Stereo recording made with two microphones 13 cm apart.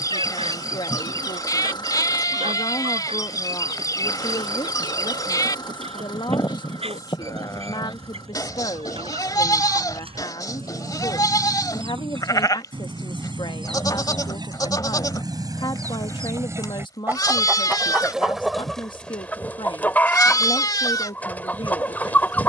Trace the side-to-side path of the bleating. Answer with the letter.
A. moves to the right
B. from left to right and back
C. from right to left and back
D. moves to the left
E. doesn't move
E.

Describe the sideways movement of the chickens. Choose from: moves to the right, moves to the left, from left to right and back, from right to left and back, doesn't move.
moves to the left.